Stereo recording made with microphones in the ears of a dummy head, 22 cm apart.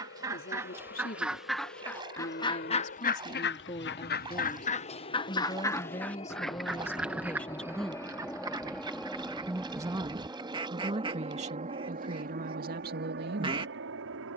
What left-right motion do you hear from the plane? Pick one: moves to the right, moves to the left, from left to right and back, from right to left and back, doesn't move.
moves to the right.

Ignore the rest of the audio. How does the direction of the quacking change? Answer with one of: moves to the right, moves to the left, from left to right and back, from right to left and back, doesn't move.
from right to left and back.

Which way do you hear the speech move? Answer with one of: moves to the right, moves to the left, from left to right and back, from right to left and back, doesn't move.
moves to the right.